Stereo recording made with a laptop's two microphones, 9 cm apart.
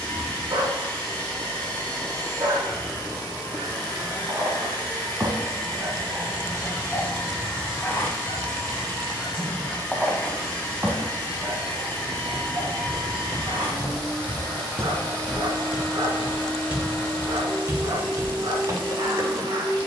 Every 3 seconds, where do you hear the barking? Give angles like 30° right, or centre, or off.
50° right, 40° right, 10° left, 10° right, 50° right, 50° right, 50° right.